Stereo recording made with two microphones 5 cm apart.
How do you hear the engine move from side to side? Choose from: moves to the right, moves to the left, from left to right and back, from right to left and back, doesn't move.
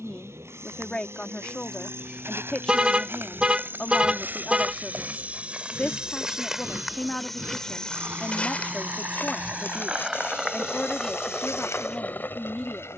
moves to the left.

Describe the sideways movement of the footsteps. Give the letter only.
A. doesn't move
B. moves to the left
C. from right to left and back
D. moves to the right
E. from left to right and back
B.